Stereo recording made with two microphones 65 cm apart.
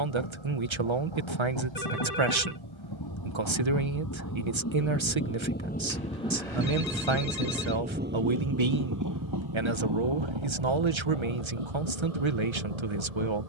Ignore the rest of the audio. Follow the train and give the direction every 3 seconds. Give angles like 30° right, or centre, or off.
40° left, 20° left, 10° right, 40° right, 60° right.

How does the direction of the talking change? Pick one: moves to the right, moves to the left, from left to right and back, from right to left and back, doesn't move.
doesn't move.